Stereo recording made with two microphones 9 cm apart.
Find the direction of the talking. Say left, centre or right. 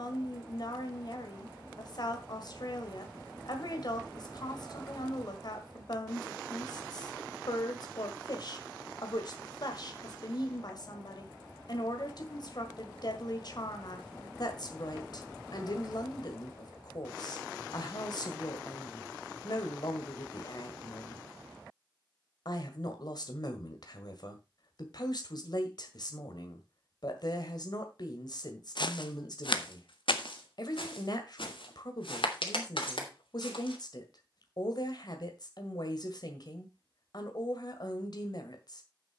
left.